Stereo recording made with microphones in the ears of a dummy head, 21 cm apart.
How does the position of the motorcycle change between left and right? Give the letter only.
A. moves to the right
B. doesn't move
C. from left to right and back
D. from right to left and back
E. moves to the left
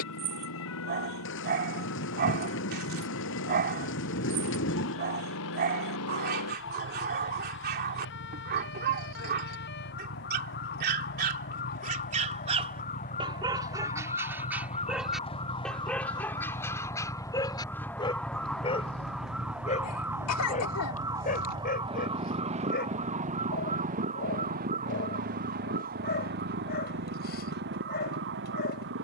A.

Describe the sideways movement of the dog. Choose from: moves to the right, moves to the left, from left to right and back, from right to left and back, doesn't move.
moves to the left.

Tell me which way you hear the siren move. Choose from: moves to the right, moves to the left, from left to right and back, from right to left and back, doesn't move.
moves to the right.